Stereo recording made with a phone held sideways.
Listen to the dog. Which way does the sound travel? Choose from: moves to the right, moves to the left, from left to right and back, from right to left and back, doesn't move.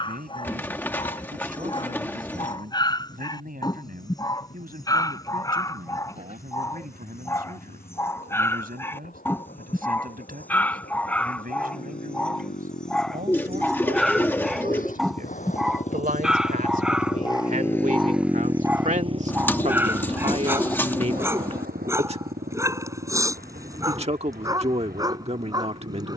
moves to the right.